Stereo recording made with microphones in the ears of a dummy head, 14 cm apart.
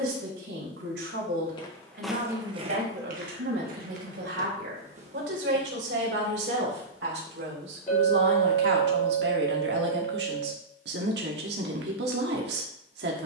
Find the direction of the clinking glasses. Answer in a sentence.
You can hear the clinking glasses on the left.